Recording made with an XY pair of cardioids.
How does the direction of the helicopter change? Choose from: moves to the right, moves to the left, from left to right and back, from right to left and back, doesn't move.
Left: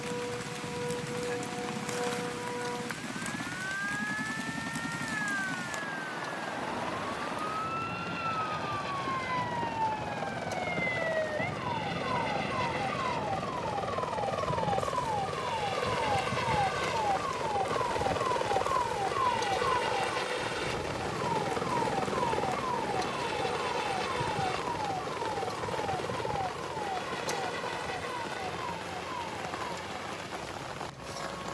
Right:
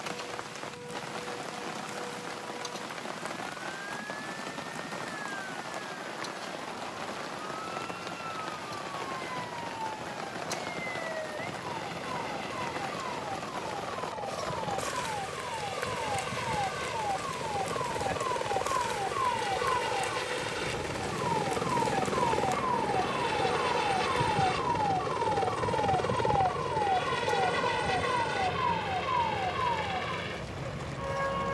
moves to the right.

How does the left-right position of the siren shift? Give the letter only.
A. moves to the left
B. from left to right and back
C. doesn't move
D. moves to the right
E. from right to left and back
D.